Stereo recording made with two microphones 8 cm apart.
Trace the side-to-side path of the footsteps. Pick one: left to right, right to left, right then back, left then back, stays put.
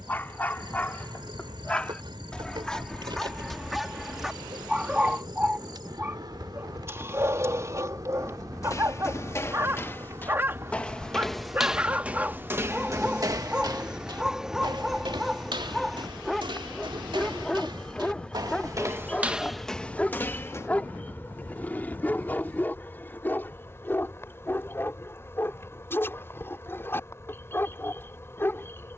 right then back.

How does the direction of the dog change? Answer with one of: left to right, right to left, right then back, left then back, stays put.
right then back.